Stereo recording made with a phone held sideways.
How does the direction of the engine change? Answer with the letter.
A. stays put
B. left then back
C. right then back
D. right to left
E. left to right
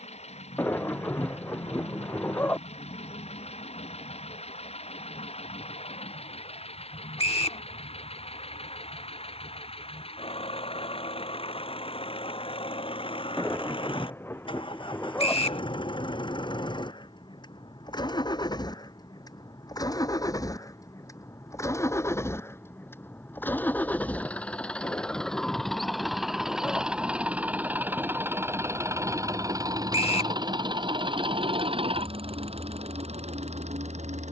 E.